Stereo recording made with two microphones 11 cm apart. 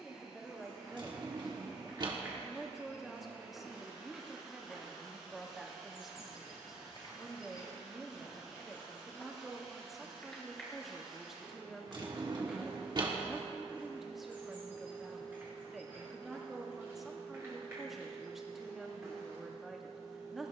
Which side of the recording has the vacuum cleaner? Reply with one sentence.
In this clip you hear the vacuum cleaner in the centre.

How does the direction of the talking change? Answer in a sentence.
In this clip you hear the talking stay in one place.